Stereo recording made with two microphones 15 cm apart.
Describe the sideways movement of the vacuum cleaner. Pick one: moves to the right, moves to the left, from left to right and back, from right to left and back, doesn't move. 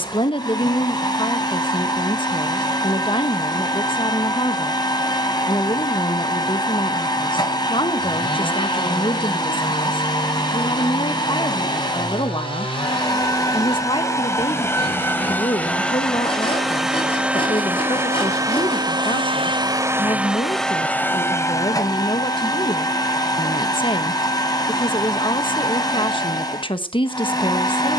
from left to right and back.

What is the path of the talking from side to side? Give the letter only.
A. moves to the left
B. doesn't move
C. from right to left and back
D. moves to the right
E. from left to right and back
B.